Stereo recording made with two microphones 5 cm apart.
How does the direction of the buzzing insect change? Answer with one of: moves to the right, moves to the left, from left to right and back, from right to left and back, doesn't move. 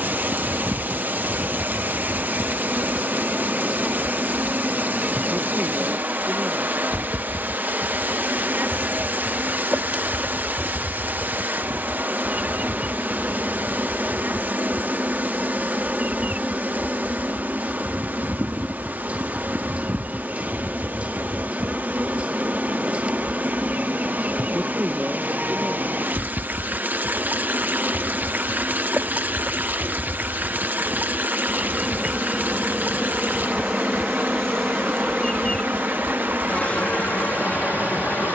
moves to the left.